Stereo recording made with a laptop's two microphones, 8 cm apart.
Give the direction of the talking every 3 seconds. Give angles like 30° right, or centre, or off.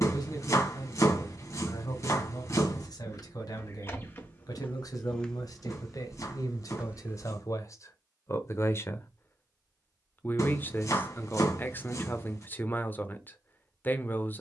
50° left, 50° left, 40° left, 20° left, 20° left.